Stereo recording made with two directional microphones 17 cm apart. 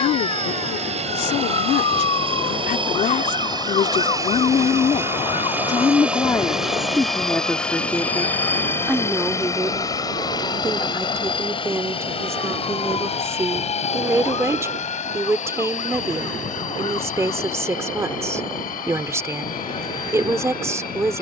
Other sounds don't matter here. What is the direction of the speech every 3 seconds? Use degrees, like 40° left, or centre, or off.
60° left, 40° left, 10° left, 10° right, 20° right, 20° right, 20° right.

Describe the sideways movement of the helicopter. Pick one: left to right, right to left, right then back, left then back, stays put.
right to left.